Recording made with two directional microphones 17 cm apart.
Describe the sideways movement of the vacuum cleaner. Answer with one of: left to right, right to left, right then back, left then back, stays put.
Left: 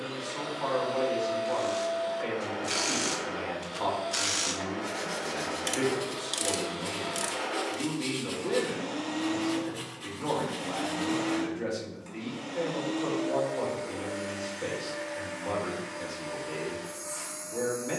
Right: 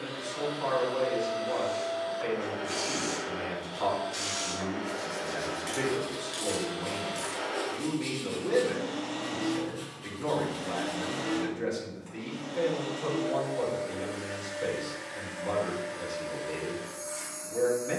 stays put.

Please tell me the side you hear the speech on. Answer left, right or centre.
centre.